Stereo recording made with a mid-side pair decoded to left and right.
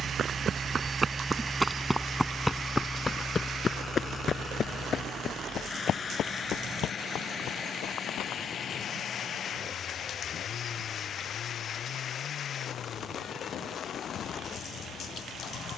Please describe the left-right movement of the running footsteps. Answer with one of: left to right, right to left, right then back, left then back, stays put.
right to left.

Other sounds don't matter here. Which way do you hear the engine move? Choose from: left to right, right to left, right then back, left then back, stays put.
right to left.